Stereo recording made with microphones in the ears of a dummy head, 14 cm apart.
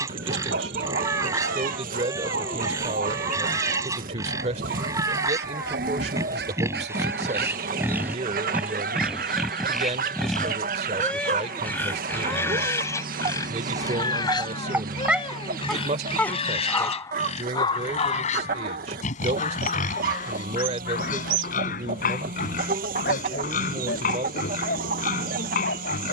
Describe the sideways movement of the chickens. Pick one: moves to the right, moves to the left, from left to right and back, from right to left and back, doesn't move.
doesn't move.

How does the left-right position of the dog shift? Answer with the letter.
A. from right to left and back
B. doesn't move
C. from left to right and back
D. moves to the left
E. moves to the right
D.